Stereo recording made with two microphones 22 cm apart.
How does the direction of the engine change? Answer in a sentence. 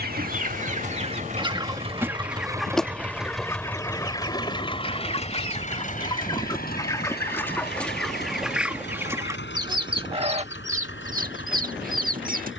In this clip you hear the engine go from the right side to the left.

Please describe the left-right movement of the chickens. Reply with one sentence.
In this clip you hear the chickens move from right to left and back again.